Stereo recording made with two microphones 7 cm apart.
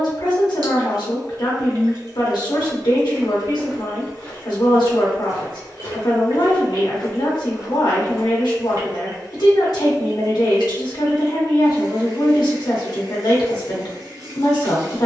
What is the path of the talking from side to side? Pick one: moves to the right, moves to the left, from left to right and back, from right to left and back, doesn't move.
doesn't move.